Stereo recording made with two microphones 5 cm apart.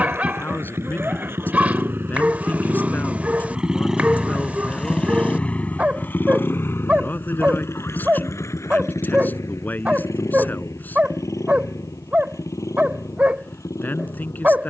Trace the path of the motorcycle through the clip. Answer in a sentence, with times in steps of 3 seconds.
You can hear the motorcycle on the right from 0 s, in the centre from 3 s and on the left from 6 s.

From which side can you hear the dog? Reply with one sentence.
In this clip you hear the dog on the right.